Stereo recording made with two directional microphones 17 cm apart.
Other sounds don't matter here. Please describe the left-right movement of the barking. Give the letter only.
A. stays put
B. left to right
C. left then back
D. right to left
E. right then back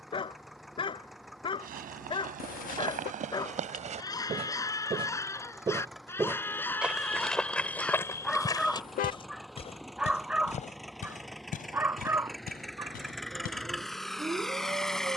B.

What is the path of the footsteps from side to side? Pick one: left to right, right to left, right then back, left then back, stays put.
right to left.